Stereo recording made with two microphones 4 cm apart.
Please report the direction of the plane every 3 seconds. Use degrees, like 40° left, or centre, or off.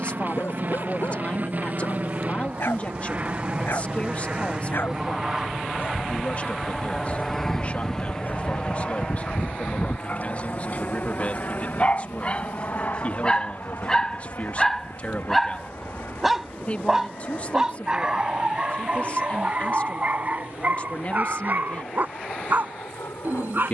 40° right, 20° right, 10° left, 30° left, 50° left, 60° left, 70° left, 70° left.